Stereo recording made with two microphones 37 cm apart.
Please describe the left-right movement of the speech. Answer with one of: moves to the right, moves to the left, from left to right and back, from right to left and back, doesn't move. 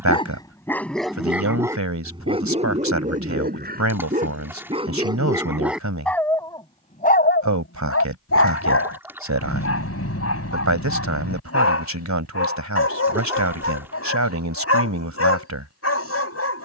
doesn't move.